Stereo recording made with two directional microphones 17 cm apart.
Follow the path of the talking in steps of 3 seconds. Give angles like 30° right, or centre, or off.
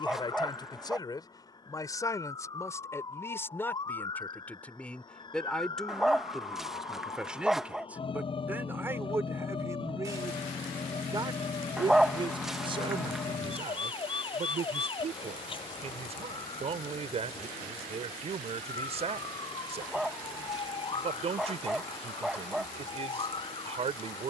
20° left, 10° left, 10° right, 20° right, 30° right, 40° right, 40° right, 40° right.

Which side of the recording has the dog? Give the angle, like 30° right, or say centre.
centre.